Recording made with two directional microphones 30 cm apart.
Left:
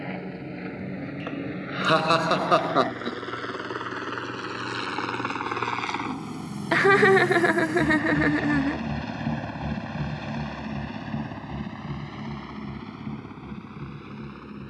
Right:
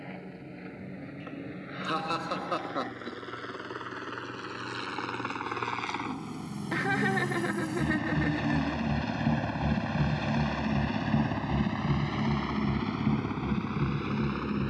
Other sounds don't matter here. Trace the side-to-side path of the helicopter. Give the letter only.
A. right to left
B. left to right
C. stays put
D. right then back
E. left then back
B.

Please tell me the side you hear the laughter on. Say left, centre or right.
left.